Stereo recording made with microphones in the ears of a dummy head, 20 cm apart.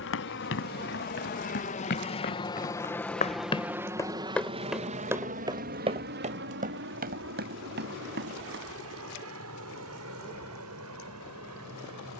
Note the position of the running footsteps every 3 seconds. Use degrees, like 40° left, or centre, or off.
50° left, centre, 40° right, off.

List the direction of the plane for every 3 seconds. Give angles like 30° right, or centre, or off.
40° left, 20° right, 50° right, 60° right.